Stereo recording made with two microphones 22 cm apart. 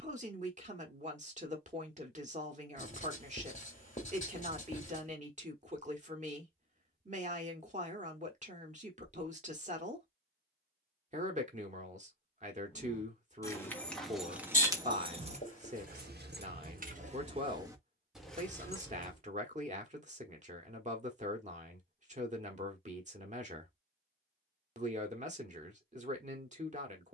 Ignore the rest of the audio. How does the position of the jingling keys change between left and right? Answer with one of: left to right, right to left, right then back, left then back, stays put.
right then back.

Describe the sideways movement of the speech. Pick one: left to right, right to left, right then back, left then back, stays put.
stays put.